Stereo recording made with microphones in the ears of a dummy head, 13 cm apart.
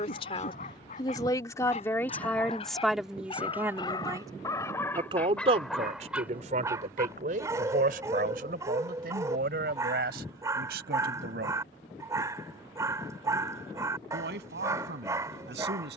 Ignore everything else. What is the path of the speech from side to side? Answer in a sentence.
In this clip you hear the speech move from left to right.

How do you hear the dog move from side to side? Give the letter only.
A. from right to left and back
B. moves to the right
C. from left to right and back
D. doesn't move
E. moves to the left
B.